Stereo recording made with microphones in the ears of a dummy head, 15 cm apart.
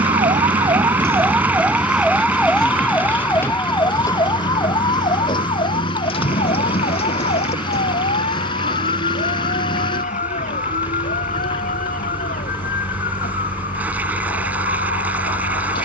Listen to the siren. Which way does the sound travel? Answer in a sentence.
In this clip you hear the siren travel towards the left.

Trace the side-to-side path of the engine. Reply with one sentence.
In this clip you hear the engine stay put.